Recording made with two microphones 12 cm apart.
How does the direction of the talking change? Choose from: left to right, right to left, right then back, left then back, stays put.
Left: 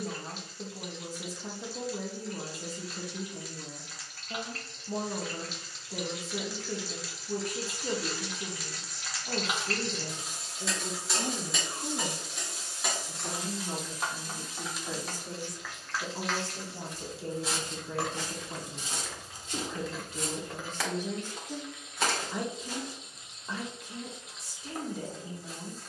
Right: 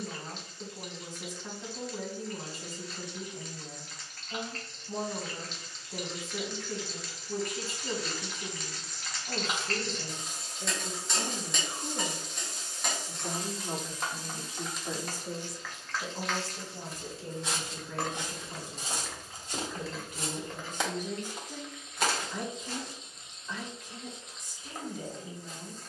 right then back.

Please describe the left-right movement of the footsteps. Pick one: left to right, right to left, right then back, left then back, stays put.
right then back.